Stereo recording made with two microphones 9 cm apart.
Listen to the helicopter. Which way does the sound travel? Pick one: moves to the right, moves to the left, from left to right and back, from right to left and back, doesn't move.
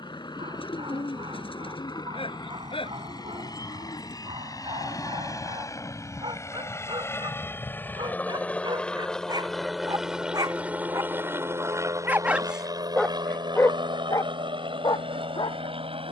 moves to the right.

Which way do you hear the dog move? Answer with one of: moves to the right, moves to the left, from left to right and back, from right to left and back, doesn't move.
moves to the left.